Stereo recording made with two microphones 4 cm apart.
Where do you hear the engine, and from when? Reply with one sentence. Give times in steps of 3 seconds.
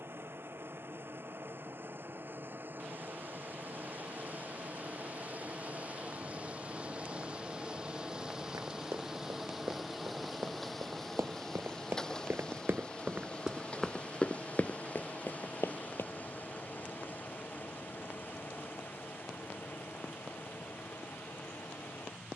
In this clip you hear the engine on the right from 0 s, in the centre from 9 s and on the left from 12 s.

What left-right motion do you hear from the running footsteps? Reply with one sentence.
In this clip you hear the running footsteps move from right to left.